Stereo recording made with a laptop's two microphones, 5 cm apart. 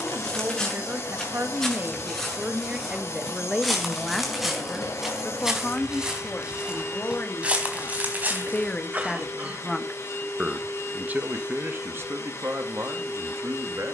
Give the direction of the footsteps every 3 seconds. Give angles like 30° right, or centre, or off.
10° left, centre, 30° right, off, off.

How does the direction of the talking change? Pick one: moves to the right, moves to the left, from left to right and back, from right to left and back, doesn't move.
from right to left and back.